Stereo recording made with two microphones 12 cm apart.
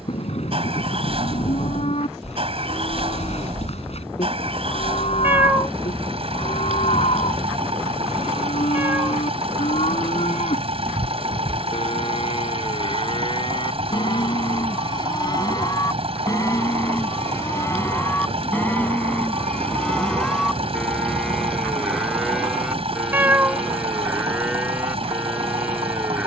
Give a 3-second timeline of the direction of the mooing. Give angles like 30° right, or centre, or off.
60° left, 60° left, 60° left, 60° left, 40° left, 30° left, 10° left, centre, 10° right.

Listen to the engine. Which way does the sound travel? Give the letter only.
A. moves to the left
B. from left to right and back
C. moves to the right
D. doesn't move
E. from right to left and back
D.